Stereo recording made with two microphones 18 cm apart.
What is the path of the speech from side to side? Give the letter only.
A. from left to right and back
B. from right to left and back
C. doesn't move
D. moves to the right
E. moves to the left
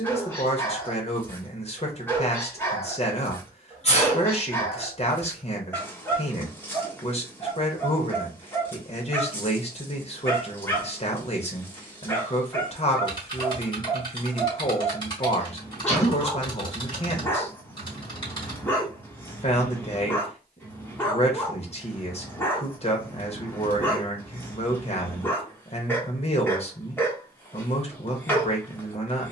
C.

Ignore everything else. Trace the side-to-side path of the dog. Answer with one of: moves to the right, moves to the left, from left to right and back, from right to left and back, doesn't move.
doesn't move.